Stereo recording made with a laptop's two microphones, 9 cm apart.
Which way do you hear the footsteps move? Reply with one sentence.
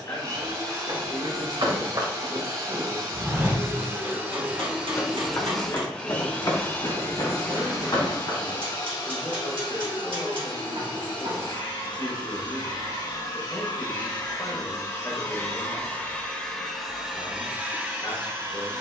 In this clip you hear the footsteps move from right to left.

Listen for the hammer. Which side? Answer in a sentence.
You can hear the hammer on the right.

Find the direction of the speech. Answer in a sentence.
In this clip you hear the speech on the left.